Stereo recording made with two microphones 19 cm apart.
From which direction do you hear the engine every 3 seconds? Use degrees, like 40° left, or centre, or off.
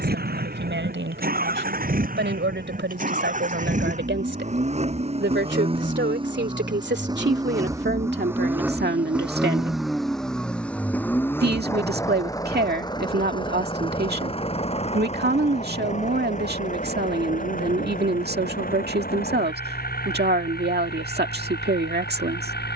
50° right, 40° right, 20° right, centre, 20° left, 40° left, 50° left, 50° left.